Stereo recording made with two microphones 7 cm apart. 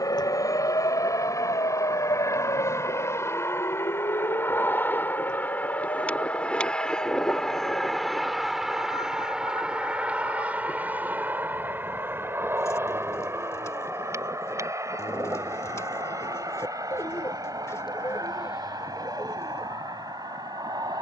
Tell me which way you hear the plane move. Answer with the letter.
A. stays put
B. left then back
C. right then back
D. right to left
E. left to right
E.